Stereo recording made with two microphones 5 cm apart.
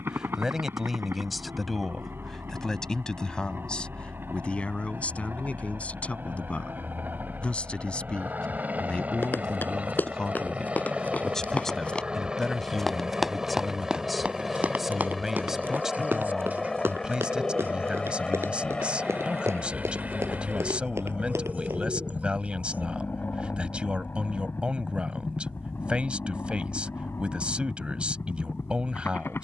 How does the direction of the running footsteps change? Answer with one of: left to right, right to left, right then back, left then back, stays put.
left to right.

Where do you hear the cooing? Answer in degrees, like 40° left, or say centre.
40° right.